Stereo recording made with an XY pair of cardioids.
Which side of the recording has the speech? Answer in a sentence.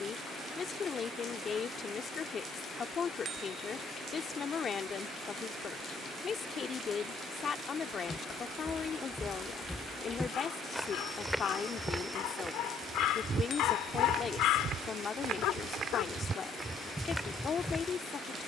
In this clip you hear the speech on the left.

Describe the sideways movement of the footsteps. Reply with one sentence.
You can hear the footsteps move from left to right and back again.